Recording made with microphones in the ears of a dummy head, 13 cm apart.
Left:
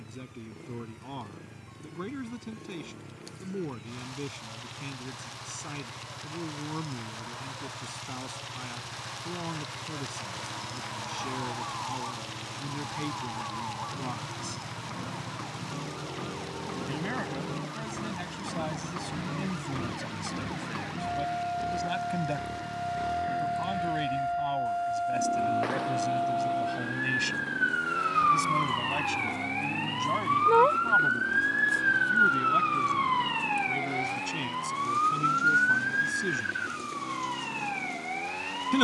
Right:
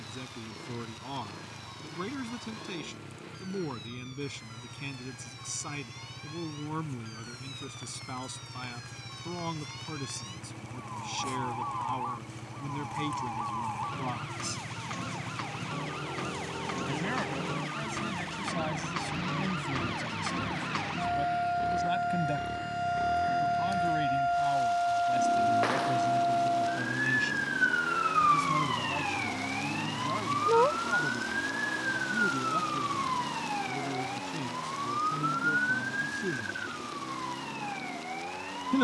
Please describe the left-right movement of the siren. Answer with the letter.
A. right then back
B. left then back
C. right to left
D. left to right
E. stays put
C.